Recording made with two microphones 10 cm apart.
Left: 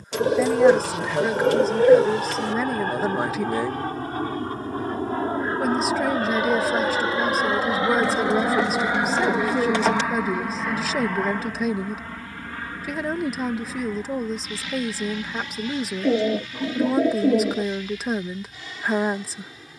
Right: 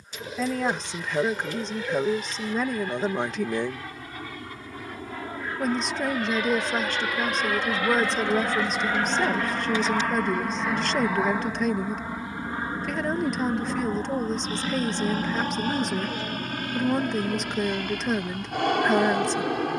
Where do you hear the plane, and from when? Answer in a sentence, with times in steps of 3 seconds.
In this clip you hear the plane on the left from 0 s, in the centre from 9 s and on the right from 12 s.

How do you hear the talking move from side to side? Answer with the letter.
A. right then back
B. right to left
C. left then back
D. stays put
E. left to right
D.